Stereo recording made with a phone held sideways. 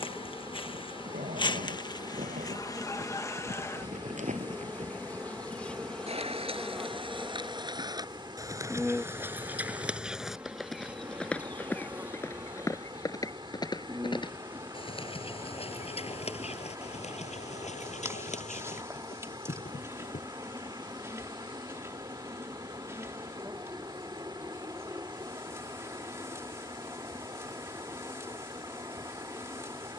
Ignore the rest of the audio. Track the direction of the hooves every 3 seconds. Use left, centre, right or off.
right, right, right, centre, left, left, left, off, off, off.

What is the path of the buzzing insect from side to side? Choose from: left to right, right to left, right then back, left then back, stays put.
left to right.